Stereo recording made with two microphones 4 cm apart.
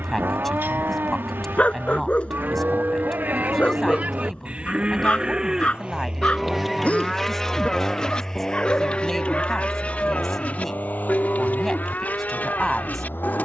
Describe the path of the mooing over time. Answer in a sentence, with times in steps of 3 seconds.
In this clip you hear the mooing on the right from 0 s, in the centre from 6 s and on the left from 9 s.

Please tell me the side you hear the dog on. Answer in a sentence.
You can hear the dog on the left.